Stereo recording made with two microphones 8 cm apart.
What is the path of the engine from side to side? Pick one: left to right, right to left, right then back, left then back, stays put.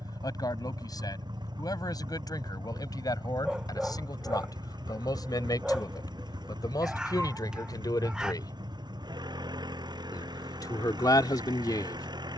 stays put.